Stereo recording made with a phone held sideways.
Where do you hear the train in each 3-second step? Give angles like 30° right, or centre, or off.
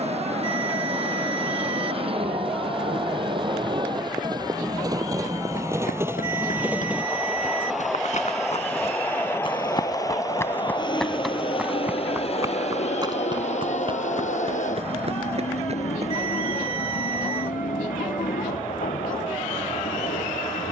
40° right, 30° right, centre, 30° left, 50° left, 70° left, 70° left.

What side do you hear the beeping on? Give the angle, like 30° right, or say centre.
40° left.